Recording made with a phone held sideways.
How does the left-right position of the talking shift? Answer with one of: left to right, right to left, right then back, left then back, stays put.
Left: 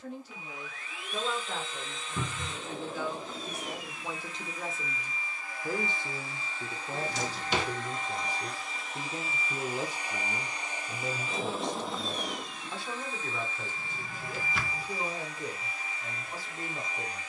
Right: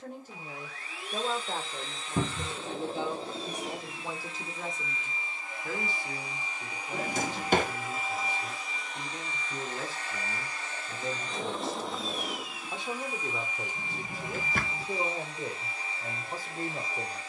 left then back.